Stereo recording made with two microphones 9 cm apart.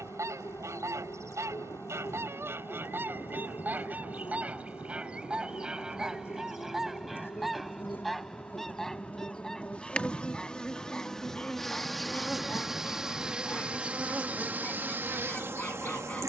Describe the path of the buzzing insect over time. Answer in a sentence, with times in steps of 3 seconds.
In this clip you hear the buzzing insect on the left from 0 s, in the centre from 9 s and on the right from 15 s.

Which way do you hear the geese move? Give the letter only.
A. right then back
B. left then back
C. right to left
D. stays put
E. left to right
C.